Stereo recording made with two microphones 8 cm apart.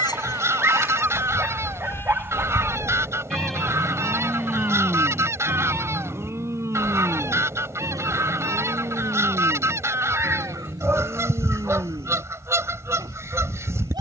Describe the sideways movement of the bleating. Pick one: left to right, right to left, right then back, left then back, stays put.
left to right.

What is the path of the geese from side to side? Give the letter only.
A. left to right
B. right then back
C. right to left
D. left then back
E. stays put
E.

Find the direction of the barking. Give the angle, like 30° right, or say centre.
30° right.